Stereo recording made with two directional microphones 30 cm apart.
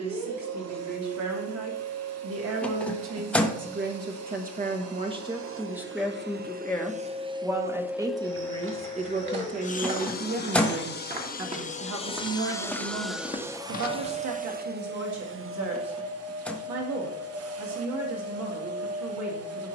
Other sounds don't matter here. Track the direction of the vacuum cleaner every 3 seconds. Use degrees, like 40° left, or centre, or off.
60° right, 50° right, 10° right, 30° left, 10° right, 50° right, 50° right.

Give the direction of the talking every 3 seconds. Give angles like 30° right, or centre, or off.
60° right, 30° right, 10° right, 40° right, 60° right, 60° right, 60° right.